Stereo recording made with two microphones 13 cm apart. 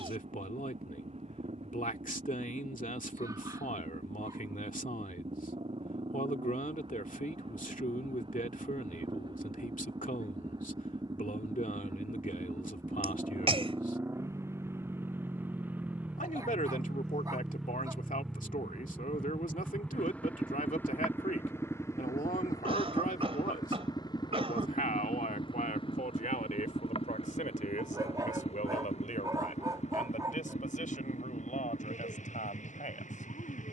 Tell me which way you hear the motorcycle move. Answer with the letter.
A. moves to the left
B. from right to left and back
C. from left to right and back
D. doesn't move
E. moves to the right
A.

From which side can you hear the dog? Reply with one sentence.
In this clip you hear the dog on the right.